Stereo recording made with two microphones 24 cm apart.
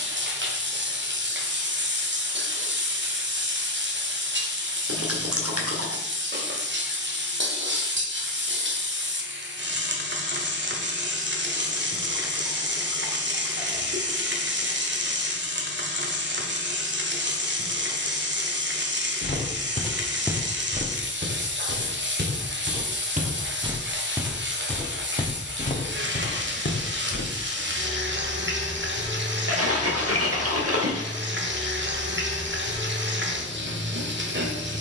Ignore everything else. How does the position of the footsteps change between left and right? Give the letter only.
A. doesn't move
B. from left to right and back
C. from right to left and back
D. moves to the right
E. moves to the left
B.